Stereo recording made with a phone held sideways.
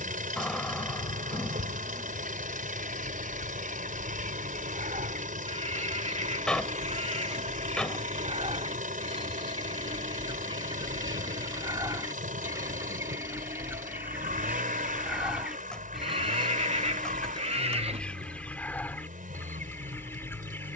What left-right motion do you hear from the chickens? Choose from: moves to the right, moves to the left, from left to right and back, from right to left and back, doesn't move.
moves to the left.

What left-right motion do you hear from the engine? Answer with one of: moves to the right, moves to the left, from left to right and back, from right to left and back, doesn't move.
doesn't move.